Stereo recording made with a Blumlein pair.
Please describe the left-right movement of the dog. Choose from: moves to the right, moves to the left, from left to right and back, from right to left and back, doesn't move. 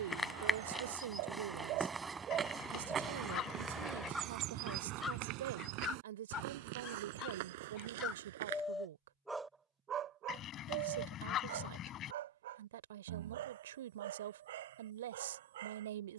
from right to left and back.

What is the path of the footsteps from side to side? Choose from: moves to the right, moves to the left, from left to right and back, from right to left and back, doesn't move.
moves to the right.